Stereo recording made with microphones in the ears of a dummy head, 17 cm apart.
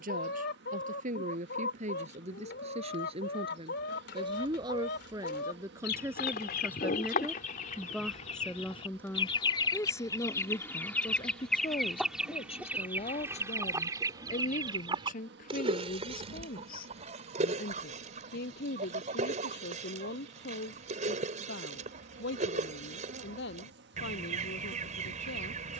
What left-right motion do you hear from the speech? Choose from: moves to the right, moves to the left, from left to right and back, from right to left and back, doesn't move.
moves to the left.